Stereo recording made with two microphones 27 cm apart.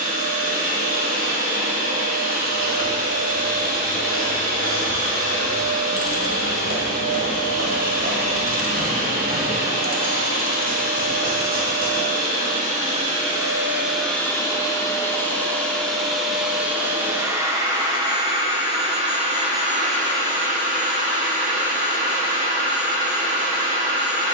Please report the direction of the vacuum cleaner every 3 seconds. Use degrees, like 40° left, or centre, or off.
30° right, 30° right, 30° right, 30° right, 10° right, centre, 30° right, 30° right.